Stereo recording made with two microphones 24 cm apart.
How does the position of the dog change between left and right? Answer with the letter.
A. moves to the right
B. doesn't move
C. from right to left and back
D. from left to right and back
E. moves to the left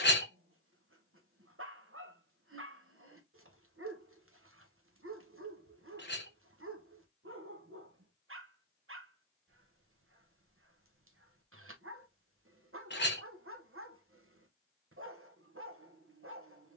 B.